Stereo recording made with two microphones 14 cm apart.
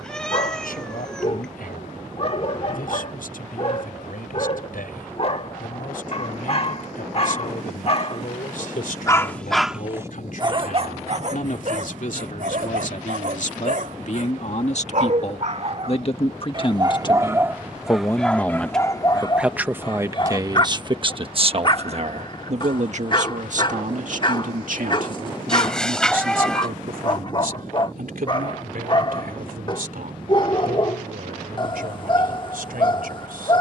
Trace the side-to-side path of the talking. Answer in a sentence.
In this clip you hear the talking travel towards the right.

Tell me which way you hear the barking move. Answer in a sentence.
You can hear the barking move from left to right and back again.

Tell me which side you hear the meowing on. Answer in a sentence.
In this clip you hear the meowing in the centre.